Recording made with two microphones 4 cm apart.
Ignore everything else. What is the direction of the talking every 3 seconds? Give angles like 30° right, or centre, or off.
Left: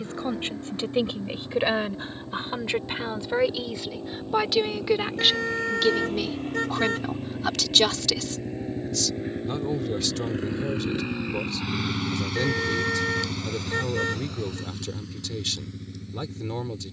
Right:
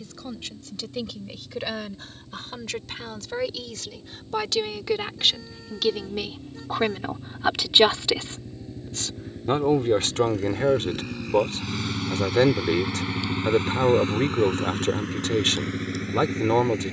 30° left, 10° left, 20° right, 50° right, 50° right, 50° right.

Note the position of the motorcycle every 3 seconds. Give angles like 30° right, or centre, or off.
70° left, 60° left, 50° left, 30° left, 30° right, 60° right.